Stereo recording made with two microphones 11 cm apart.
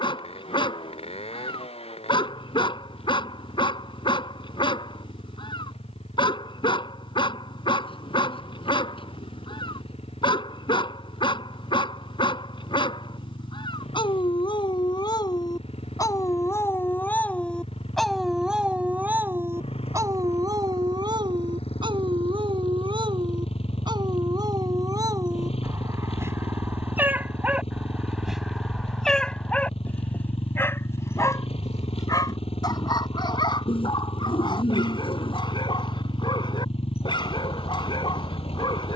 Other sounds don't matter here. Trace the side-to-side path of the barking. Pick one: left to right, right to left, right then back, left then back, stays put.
right then back.